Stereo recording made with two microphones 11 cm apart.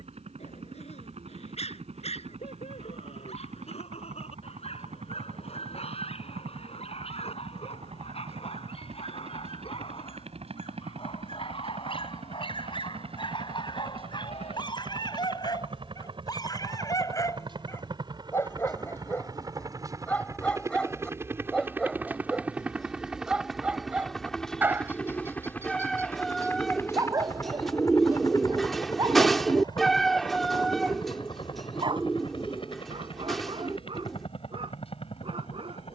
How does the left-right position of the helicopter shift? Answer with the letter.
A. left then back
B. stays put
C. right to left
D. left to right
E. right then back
C.